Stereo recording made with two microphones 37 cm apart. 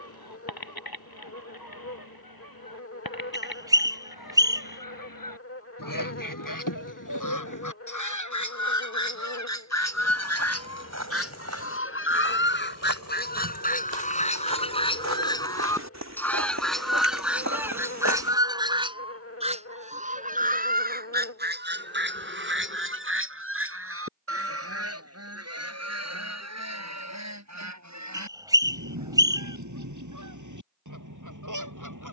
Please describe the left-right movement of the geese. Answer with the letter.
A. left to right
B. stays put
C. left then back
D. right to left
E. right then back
A.